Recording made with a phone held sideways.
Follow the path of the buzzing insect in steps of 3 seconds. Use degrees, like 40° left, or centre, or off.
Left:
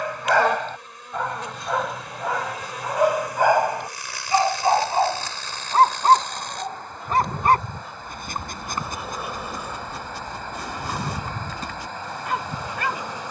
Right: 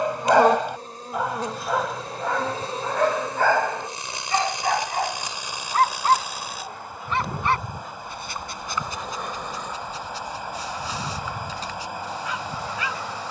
40° right, 20° right, centre, 10° left, 20° left.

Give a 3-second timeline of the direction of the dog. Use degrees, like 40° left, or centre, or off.
centre, 20° left, 40° left, 50° left, 50° left.